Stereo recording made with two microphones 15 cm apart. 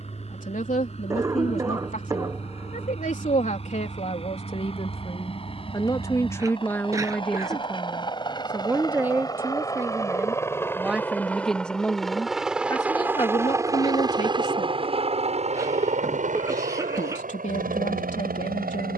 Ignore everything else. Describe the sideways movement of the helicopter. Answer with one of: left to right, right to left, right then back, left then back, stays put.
left to right.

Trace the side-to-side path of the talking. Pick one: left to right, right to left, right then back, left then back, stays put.
right then back.